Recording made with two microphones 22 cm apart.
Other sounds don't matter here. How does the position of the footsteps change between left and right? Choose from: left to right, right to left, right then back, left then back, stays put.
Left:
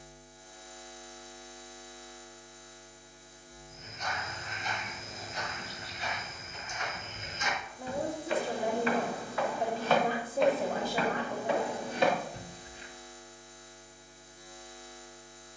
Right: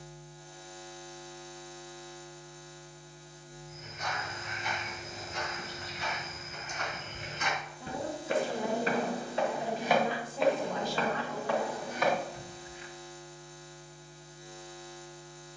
right to left.